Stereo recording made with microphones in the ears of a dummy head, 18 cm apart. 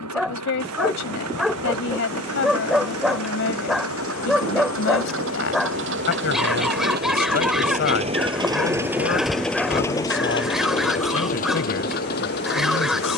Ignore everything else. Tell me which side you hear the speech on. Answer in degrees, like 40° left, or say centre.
60° left.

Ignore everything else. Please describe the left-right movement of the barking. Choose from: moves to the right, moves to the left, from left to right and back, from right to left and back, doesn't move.
doesn't move.